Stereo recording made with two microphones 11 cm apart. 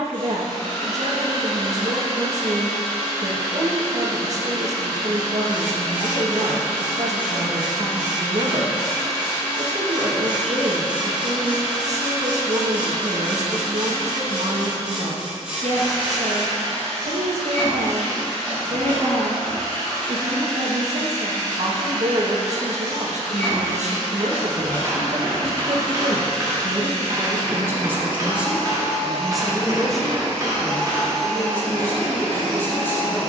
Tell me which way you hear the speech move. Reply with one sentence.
In this clip you hear the speech move from right to left.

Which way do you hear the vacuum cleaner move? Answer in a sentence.
In this clip you hear the vacuum cleaner stay in one place.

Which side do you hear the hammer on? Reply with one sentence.
In this clip you hear the hammer on the right.